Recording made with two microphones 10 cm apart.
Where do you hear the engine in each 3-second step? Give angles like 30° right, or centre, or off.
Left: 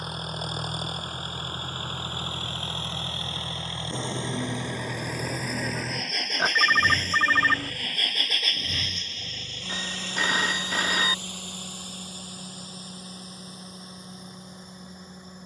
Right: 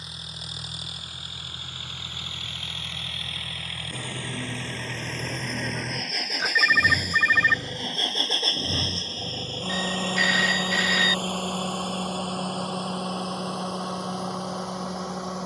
40° left, 20° left, 20° right, 50° right, 60° right.